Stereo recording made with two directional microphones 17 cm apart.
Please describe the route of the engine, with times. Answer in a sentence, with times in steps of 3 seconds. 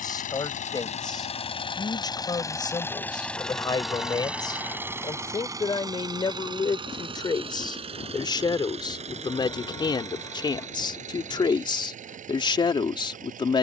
You can hear the engine on the left from 0 s, in the centre from 3 s and on the right from 6 s.